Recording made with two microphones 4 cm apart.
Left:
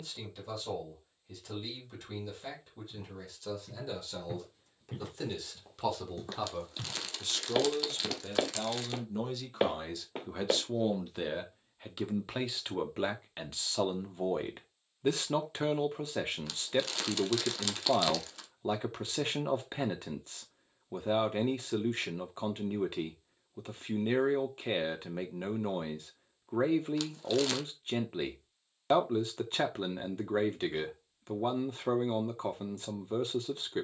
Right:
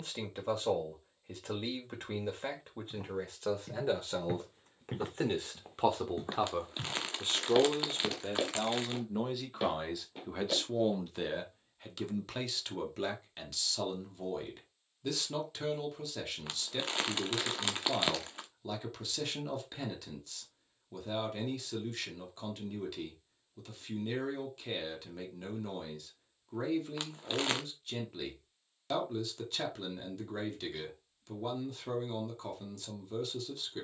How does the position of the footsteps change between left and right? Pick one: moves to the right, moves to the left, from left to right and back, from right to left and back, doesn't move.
moves to the left.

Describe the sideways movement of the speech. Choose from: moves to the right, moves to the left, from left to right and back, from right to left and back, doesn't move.
moves to the left.